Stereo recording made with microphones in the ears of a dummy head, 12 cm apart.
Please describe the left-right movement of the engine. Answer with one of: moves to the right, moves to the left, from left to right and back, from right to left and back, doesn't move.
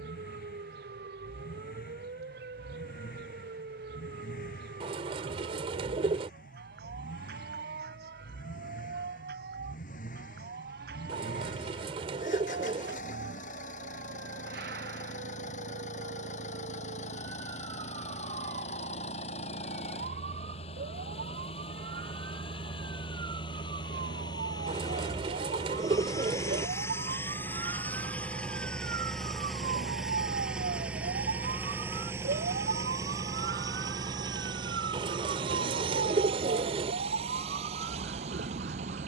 moves to the right.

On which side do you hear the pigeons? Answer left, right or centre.
right.